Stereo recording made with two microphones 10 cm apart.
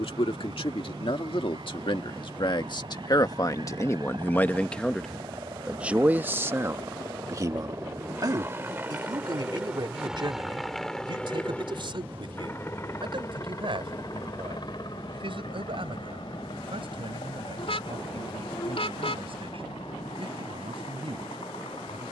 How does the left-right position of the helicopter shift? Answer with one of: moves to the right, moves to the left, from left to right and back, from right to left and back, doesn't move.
moves to the left.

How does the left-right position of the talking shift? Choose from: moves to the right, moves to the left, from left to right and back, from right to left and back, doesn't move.
moves to the right.